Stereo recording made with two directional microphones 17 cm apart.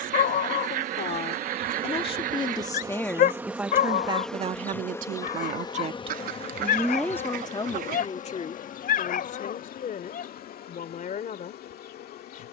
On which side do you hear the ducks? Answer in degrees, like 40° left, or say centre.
60° right.